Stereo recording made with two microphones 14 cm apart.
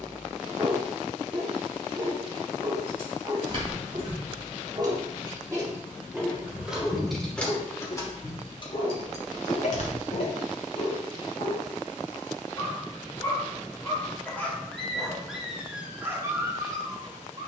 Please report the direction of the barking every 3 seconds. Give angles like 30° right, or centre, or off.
30° right, 30° right, 30° left, 50° left, 20° left, 20° right.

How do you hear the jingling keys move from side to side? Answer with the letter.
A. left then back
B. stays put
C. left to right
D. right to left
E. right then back
D.